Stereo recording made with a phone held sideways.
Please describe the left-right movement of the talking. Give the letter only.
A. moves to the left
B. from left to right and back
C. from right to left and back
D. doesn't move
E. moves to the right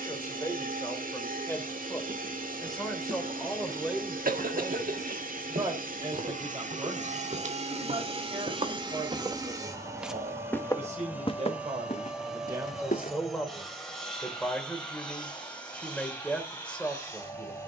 B.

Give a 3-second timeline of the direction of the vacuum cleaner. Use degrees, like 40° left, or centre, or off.
70° right, 70° right, 50° right, 20° right, centre, 10° left.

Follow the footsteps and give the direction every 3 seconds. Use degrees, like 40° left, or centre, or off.
80° right, 70° right, 60° right, 10° left, 60° left, off.